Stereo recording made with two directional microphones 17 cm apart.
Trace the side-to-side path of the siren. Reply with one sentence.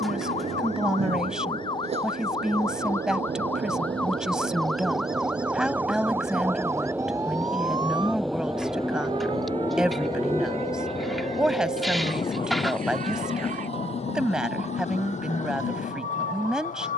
In this clip you hear the siren move to the right.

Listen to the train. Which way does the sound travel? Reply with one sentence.
In this clip you hear the train move to the left.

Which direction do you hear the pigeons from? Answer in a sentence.
In this clip you hear the pigeons in the centre.